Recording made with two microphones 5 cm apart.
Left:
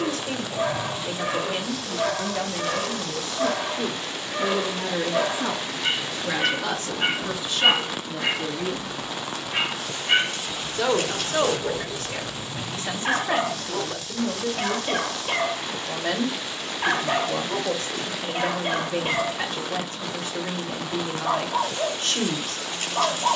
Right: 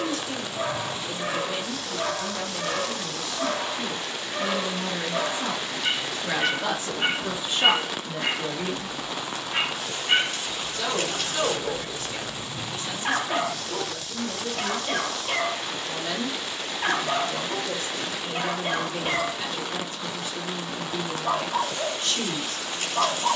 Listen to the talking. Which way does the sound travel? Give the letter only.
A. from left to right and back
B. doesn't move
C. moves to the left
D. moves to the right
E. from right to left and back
A.